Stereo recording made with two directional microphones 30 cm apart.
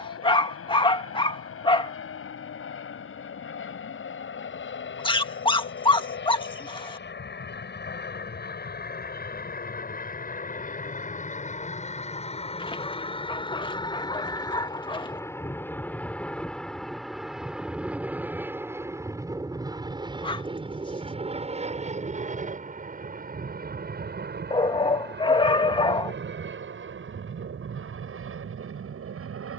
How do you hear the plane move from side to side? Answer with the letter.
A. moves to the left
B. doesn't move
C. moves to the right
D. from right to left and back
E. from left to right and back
C.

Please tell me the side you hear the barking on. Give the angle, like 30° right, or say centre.
20° left.